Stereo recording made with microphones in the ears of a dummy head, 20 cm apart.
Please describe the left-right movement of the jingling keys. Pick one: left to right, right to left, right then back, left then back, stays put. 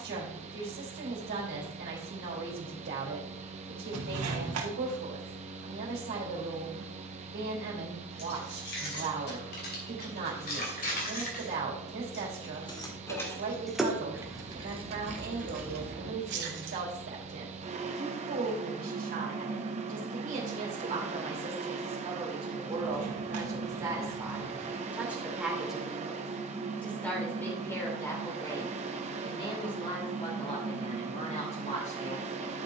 left to right.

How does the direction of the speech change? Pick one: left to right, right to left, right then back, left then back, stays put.
right to left.